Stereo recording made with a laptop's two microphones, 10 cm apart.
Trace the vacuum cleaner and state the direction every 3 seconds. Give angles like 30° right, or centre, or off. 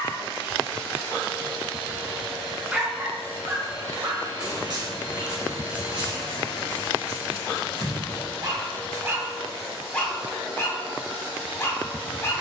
20° right, 40° left, 30° left, 10° right.